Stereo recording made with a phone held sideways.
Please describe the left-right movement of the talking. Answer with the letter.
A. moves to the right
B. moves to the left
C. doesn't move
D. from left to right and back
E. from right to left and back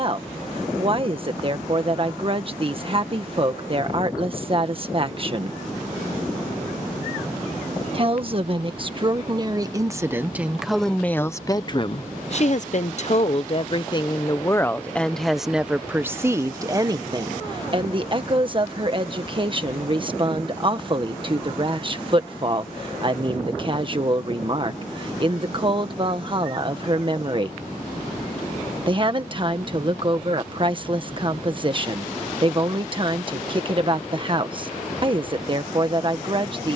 E.